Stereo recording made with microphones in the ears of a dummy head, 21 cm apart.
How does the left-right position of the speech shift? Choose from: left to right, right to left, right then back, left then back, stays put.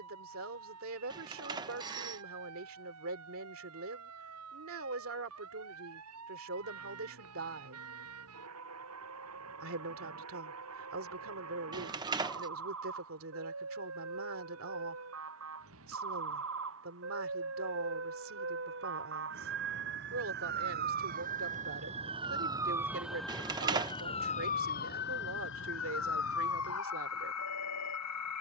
stays put.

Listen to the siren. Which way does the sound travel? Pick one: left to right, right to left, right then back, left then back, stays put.
right to left.